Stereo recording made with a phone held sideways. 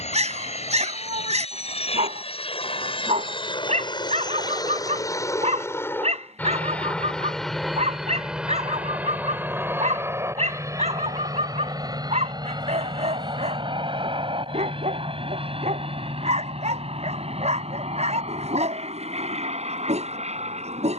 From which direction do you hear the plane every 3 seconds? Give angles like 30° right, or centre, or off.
60° left, 30° left, centre, 20° right, 30° right, 40° right, 50° right.